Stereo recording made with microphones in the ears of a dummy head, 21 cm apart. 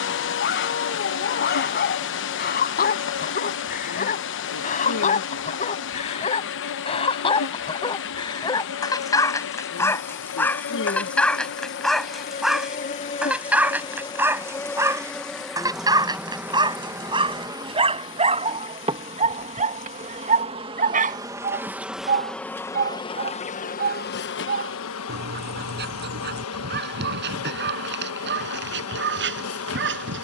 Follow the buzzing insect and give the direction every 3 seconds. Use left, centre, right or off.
left, left, left, left, left, centre, right, centre, left, left.